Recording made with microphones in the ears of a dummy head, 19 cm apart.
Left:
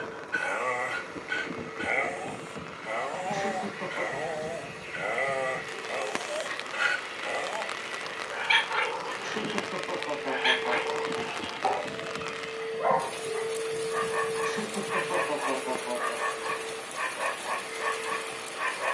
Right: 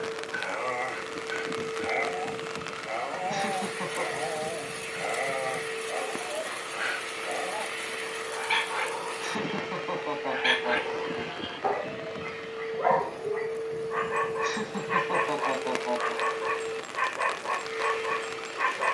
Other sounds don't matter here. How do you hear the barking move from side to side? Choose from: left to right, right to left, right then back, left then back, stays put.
left to right.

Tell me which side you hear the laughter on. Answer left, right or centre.
right.